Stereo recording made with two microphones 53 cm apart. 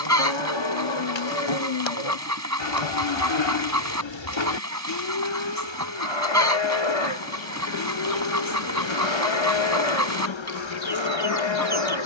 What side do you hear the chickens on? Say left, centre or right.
right.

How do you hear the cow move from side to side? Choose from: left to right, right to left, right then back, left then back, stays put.
stays put.